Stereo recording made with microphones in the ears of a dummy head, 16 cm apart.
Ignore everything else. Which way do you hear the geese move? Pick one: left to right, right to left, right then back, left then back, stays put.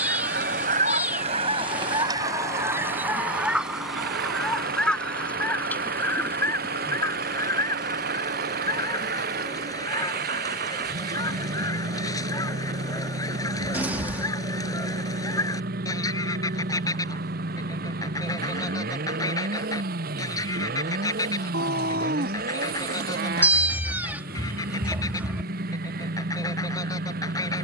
right to left.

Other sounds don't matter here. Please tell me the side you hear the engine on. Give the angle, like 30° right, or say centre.
50° right.